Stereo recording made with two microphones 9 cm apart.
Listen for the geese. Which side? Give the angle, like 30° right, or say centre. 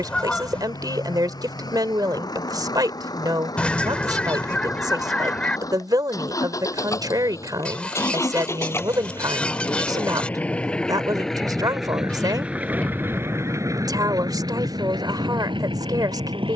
10° left.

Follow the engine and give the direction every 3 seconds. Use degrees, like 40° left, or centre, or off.
50° left, 40° left, 30° left, 10° left, 30° right, 70° right.